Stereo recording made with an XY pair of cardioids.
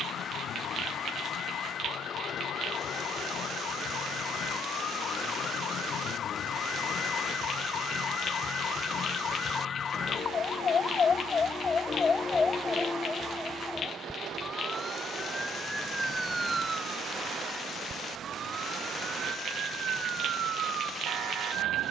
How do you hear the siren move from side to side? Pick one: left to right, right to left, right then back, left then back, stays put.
left to right.